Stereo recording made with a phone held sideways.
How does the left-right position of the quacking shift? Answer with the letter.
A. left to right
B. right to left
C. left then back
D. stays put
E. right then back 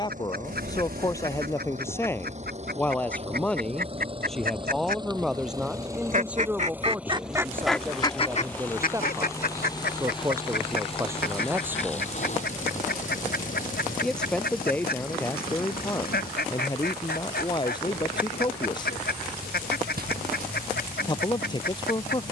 B.